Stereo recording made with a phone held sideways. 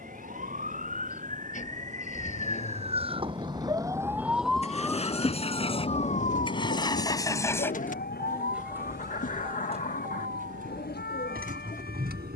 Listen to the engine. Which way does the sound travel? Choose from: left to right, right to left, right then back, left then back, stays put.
left to right.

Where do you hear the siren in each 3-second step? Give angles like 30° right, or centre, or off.
60° right, centre, 60° left, 80° left.